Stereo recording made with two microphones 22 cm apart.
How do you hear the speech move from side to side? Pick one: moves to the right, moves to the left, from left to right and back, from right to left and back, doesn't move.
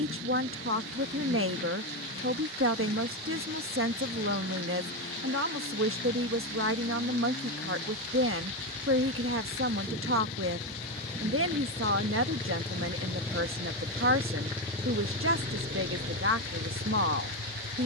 doesn't move.